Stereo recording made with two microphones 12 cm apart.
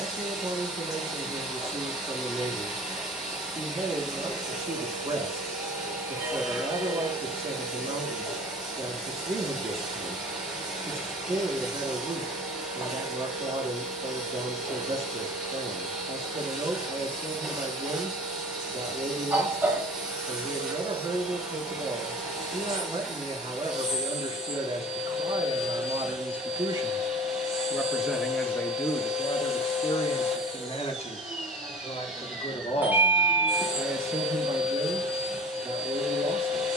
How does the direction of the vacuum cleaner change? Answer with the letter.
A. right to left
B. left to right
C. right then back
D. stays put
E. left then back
D.